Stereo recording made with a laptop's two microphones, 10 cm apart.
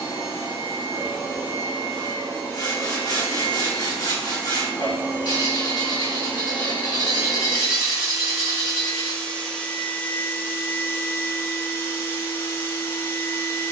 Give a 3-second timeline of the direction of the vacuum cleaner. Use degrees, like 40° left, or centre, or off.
40° right, 30° right, 10° right, 20° left, 30° left.